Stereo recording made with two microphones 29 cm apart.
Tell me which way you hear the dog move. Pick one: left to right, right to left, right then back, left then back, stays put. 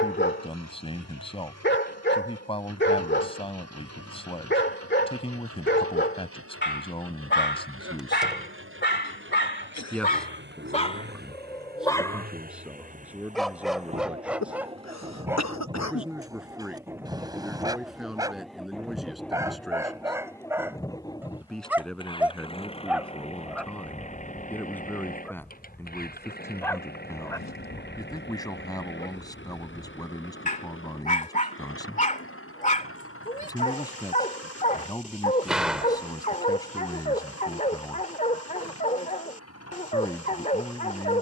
right then back.